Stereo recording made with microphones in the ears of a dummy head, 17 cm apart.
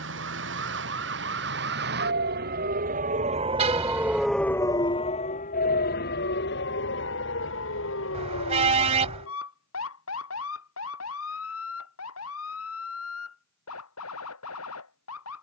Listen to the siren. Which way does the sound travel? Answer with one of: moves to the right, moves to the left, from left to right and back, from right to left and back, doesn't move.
moves to the left.